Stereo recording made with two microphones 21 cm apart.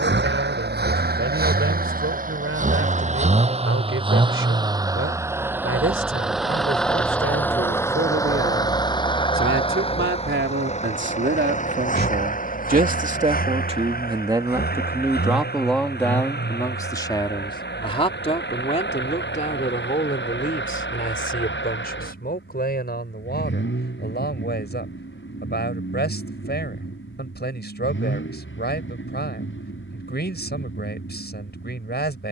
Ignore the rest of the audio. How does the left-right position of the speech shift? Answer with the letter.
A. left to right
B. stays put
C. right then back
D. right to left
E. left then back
D.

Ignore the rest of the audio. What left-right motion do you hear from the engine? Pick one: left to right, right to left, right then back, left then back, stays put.
right to left.